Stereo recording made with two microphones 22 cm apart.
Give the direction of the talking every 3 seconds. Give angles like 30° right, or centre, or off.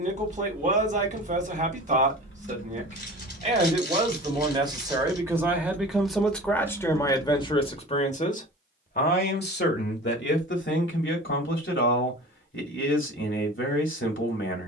40° right, 20° right, 20° left, 60° left, 70° left.